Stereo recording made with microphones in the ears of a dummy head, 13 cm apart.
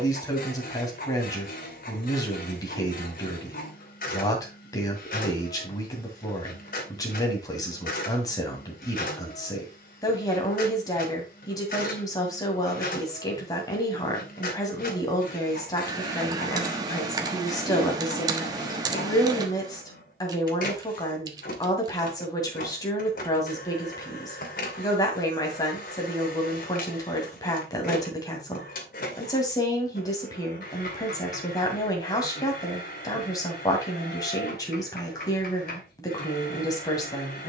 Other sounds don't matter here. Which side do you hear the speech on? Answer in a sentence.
In this clip you hear the speech on the left.